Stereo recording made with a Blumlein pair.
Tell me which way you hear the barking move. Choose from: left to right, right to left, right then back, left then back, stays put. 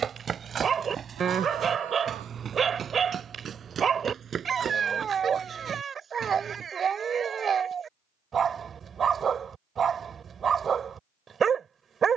stays put.